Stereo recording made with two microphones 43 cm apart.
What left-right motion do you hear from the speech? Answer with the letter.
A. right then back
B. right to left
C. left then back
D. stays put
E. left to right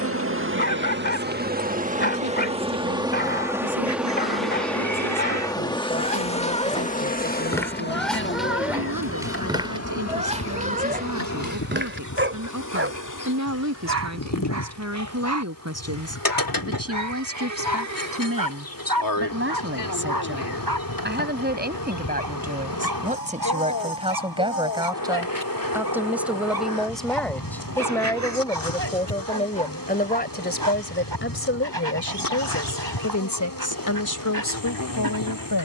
B.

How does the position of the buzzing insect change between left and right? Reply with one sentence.
In this clip you hear the buzzing insect go from the right side to the left.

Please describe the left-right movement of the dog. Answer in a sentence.
You can hear the dog travel towards the right.